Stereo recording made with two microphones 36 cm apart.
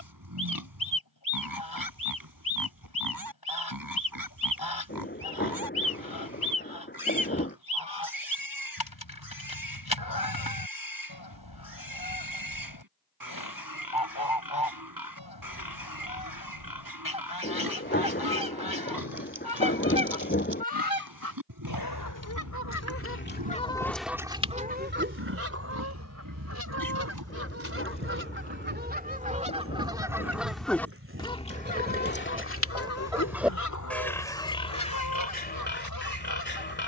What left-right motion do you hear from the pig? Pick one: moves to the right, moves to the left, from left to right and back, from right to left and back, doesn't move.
moves to the left.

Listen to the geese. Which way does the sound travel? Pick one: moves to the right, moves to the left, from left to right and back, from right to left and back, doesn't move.
from left to right and back.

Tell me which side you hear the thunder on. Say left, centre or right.
left.